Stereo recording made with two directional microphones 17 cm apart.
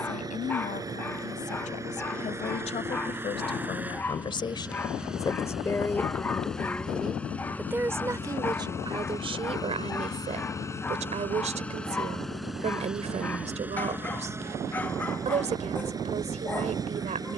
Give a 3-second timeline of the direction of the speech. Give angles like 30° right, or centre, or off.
50° left, 30° left, 10° right, 40° right, 40° right, 40° right.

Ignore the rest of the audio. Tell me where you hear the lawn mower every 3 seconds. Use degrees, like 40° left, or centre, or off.
20° right, 10° right, 10° left, 20° left, 10° right, 20° right.